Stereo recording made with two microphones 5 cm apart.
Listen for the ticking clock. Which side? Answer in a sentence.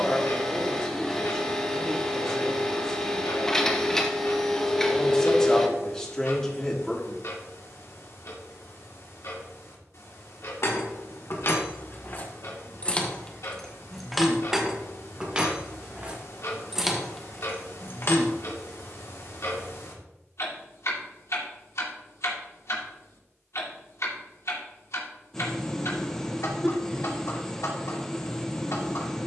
You can hear the ticking clock on the left.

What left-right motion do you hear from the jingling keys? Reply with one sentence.
In this clip you hear the jingling keys move from left to right and back again.